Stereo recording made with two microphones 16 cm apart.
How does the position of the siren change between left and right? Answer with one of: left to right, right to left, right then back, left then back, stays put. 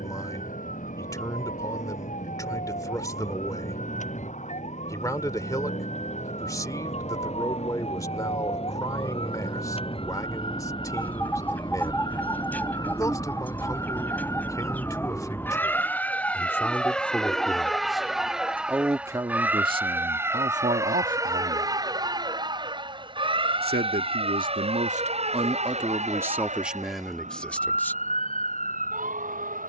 left to right.